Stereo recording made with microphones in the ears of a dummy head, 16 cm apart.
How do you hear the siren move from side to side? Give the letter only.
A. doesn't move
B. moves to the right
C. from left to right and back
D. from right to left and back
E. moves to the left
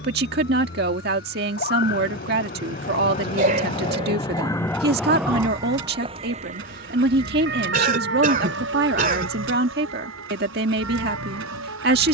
B.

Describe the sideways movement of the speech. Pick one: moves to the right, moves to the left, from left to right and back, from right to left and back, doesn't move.
doesn't move.